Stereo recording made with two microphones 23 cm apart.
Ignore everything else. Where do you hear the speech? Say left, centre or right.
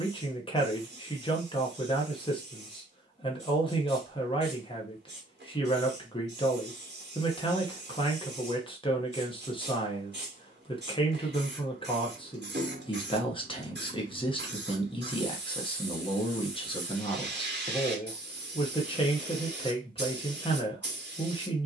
left.